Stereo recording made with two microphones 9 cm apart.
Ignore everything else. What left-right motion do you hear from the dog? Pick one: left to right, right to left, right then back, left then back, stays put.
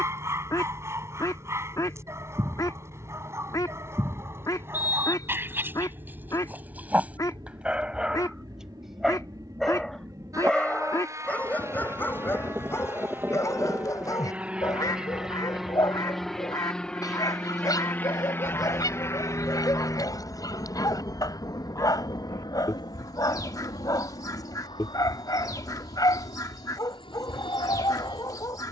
right to left.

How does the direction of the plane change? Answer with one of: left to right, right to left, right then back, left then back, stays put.
right to left.